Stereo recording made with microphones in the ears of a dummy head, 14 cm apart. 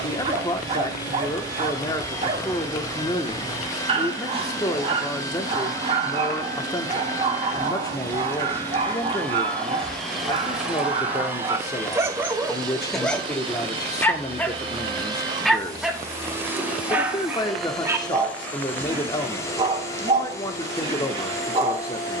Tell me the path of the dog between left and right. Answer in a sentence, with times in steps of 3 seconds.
In this clip you hear the dog on the right from 0 s, in the centre from 12 s and on the right from 18 s.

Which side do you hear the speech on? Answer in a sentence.
You can hear the speech on the left.